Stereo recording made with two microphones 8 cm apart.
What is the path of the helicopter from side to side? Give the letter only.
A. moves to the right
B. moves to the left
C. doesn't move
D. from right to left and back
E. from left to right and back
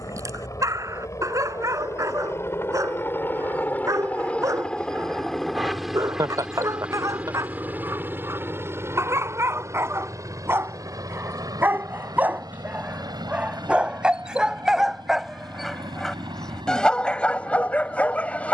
A.